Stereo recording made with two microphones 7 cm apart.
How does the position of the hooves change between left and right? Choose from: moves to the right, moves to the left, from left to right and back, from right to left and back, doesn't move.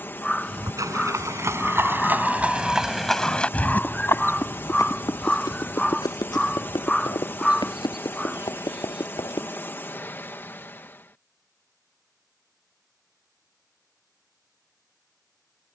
moves to the left.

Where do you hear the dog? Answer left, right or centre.
centre.